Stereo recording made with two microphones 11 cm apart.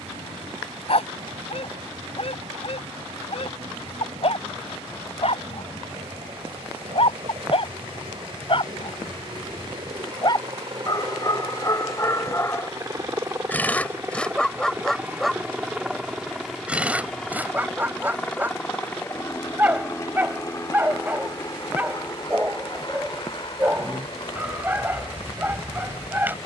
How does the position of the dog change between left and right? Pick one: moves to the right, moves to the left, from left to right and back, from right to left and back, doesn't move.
moves to the right.